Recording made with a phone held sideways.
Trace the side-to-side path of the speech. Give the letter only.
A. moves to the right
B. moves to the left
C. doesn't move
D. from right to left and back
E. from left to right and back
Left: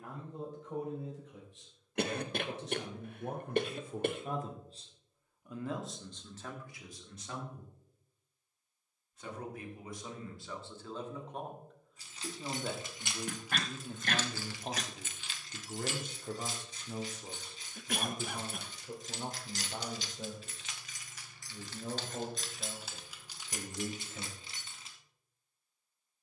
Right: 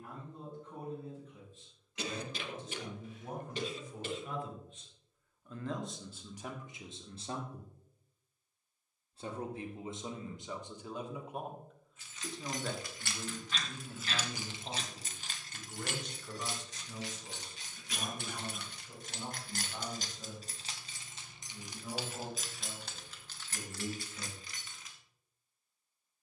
E.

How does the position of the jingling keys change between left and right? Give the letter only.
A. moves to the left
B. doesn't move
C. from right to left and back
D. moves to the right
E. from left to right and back
E.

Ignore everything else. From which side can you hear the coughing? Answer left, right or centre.
left.